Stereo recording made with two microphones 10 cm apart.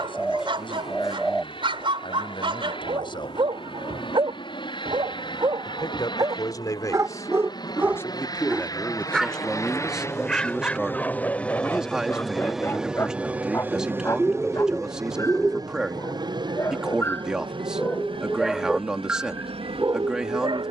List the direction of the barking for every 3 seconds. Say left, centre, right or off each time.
right, right, right, centre, left, left, right.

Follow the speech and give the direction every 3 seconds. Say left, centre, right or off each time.
left, left, left, centre, centre, centre, centre.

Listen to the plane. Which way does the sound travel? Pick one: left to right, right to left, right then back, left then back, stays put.
left to right.